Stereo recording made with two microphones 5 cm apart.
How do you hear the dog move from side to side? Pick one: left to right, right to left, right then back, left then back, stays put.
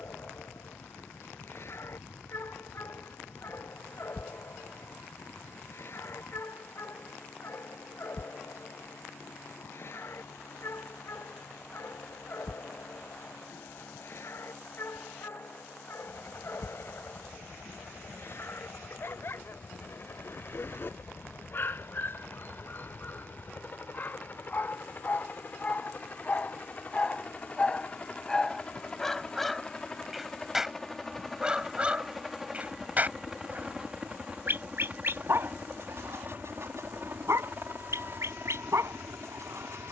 left to right.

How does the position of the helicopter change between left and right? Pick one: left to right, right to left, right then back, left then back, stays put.
left to right.